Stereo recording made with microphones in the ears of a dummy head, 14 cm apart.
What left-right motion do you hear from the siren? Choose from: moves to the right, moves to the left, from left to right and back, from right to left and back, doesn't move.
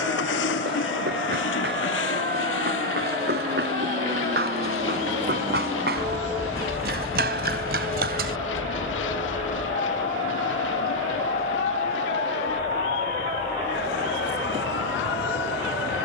moves to the left.